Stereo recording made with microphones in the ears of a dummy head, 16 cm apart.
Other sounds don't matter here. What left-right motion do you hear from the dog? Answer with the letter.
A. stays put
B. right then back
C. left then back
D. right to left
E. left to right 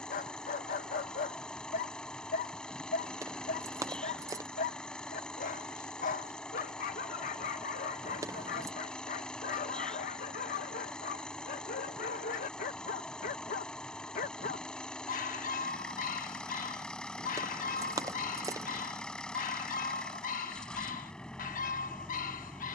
A.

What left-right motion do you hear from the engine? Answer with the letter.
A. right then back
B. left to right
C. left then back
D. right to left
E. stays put
E.